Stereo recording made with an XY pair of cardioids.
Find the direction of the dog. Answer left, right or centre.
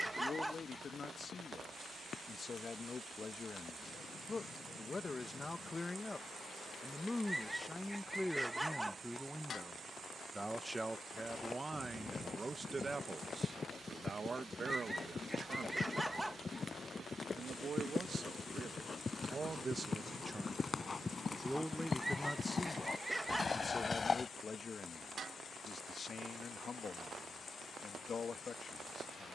centre.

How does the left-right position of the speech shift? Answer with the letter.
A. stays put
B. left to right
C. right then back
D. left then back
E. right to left
C.